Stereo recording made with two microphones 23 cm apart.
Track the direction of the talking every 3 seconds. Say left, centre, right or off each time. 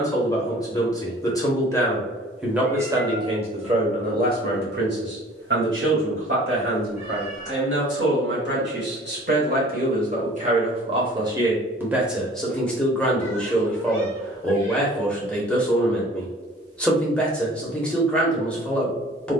centre, right, right, right, centre, centre, centre.